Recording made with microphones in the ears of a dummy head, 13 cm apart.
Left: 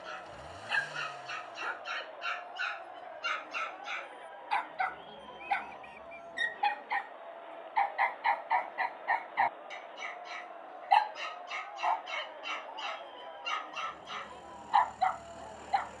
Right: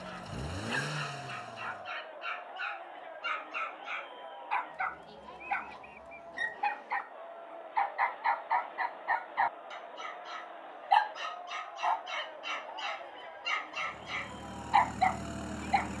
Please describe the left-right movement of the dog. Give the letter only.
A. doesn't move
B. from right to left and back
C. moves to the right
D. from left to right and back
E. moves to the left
C.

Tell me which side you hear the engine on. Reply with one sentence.
You can hear the engine on the right.